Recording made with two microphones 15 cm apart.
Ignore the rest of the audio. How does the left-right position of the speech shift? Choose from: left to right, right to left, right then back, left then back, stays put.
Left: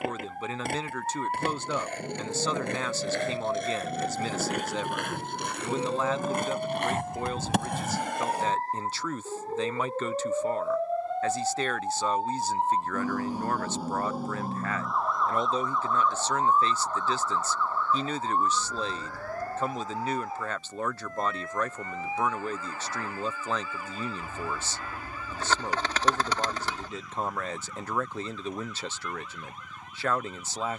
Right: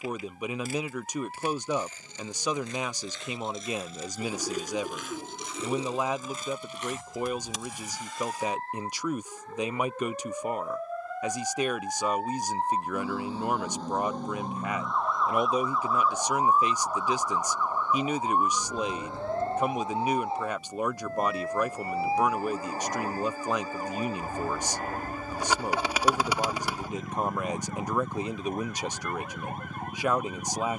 stays put.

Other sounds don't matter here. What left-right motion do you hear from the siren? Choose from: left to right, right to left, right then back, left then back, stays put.
left to right.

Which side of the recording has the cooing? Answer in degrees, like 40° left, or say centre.
10° right.